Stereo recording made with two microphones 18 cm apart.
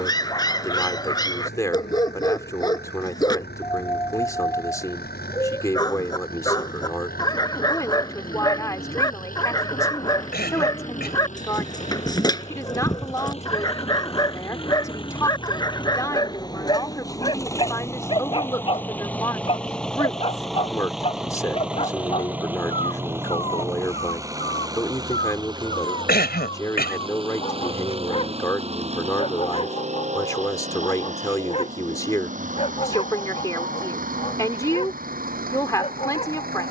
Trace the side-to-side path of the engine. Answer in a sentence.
You can hear the engine go from the left side to the right.